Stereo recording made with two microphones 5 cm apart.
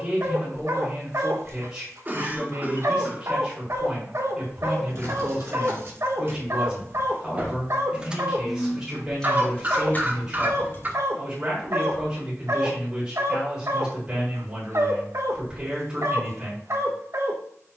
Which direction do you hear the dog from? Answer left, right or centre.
right.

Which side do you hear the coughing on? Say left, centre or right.
right.